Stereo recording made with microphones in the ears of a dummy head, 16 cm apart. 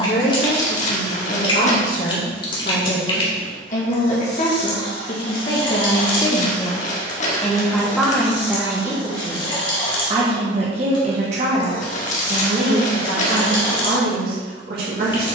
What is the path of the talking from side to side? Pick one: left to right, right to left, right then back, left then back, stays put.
left to right.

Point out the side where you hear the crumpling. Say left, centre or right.
left.